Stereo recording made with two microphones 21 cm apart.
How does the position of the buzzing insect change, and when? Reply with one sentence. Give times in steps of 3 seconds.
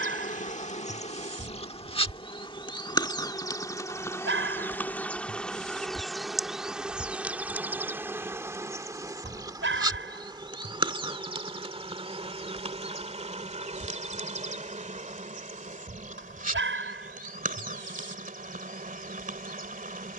In this clip you hear the buzzing insect on the left from 0 s, in the centre from 3 s and on the right from 9 s.